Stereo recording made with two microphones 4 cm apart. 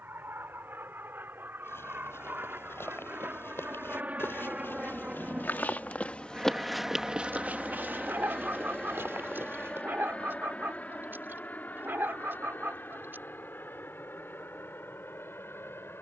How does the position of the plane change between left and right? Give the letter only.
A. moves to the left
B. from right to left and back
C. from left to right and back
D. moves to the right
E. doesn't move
A.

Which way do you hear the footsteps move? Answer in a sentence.
In this clip you hear the footsteps move to the right.